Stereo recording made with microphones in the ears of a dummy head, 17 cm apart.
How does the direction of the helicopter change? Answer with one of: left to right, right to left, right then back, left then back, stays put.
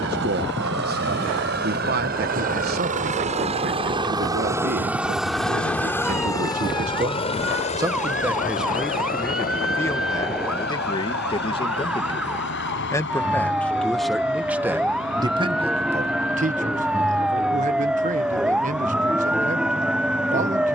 right to left.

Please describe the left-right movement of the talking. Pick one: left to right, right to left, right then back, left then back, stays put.
left then back.